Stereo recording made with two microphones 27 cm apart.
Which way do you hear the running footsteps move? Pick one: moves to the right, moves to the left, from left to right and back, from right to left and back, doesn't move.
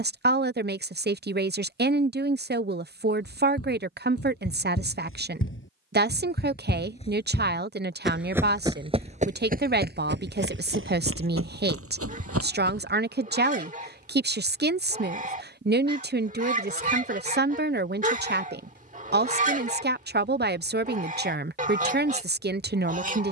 moves to the right.